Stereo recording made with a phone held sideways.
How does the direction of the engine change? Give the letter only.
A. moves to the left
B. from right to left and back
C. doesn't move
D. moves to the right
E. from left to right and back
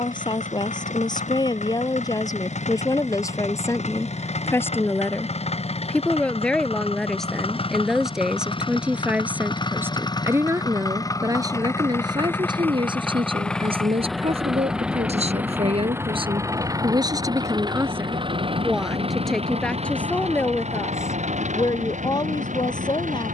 D.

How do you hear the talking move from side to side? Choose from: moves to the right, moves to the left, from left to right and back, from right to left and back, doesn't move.
from left to right and back.